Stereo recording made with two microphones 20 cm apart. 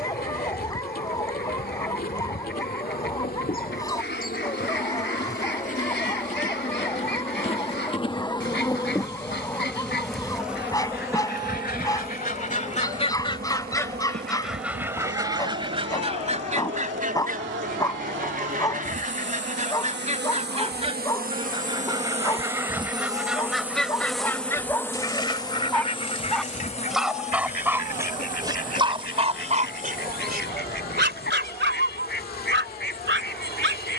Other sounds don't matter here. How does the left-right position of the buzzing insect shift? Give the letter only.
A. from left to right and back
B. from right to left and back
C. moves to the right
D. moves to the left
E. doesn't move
A.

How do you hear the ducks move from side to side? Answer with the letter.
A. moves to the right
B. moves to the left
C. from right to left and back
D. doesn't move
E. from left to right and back
E.